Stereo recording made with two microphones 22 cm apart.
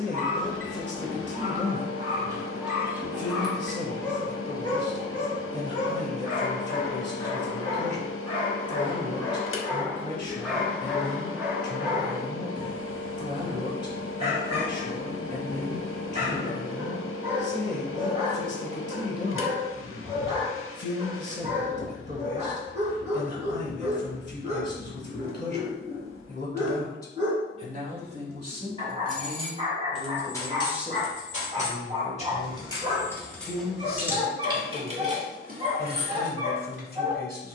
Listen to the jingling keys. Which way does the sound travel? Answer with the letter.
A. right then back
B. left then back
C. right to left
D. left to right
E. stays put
B.